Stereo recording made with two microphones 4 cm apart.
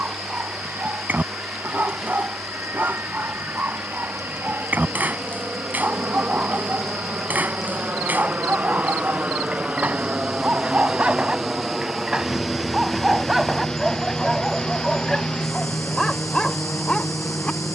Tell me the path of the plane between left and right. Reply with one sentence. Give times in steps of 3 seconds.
You can hear the plane on the right from 0 s, in the centre from 12 s and on the left from 15 s.